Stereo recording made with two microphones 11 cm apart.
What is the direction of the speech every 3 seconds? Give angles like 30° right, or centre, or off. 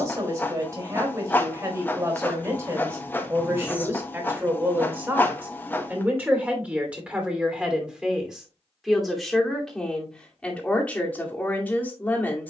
30° right, 20° right, 10° right, 10° left.